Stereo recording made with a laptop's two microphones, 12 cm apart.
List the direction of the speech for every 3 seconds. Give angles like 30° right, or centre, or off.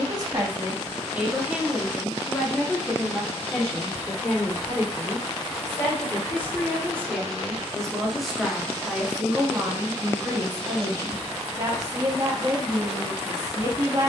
10° right, 20° left, 10° left, 30° right, 30° right.